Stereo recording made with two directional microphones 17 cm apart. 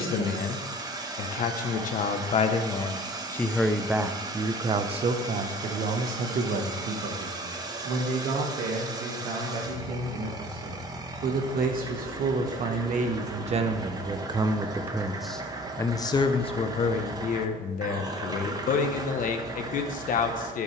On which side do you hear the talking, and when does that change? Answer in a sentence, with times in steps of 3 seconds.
In this clip you hear the talking on the left from 0 s, on the right from 3 s and on the left from 15 s.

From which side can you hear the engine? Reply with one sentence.
In this clip you hear the engine on the right.